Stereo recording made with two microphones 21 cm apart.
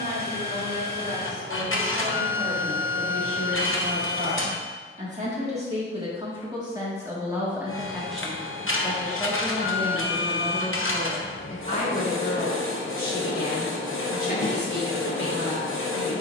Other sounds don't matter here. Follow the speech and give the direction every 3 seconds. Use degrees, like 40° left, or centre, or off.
60° right, 40° right, 10° right, 20° left, 40° left, 50° left.